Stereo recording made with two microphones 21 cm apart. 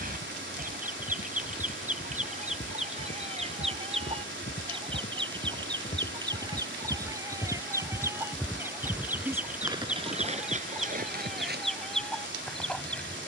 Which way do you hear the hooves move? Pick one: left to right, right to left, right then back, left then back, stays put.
left to right.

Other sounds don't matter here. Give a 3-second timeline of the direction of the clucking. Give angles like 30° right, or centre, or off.
40° right, 30° right, 10° right, centre, centre.